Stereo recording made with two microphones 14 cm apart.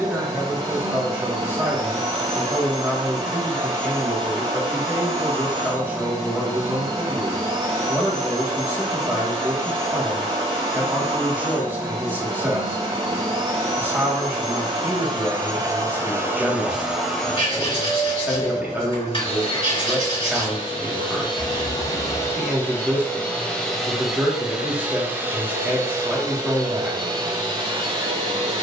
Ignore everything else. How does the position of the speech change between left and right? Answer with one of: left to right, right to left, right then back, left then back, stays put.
stays put.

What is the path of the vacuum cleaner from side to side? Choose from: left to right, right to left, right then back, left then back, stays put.
left then back.